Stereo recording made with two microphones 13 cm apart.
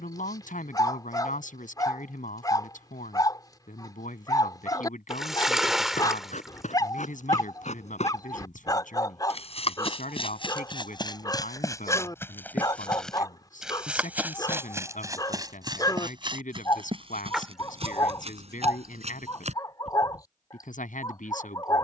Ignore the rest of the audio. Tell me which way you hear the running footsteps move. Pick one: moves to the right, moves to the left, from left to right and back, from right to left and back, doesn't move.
moves to the right.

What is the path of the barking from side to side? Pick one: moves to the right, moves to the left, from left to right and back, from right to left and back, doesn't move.
doesn't move.